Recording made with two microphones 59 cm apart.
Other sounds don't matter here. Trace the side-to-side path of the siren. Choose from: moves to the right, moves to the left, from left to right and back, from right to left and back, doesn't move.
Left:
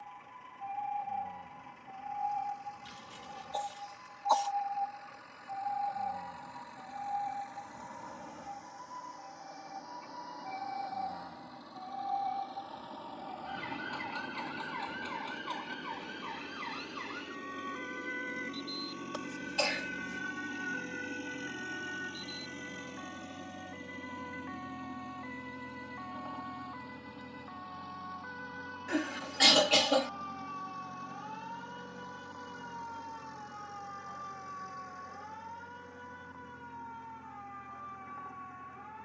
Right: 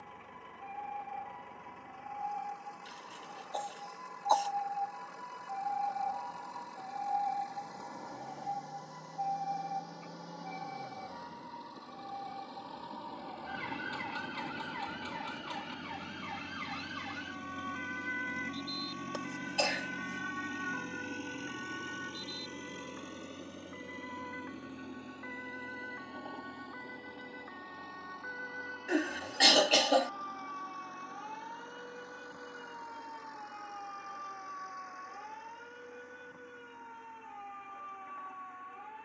moves to the right.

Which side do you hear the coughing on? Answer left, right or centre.
left.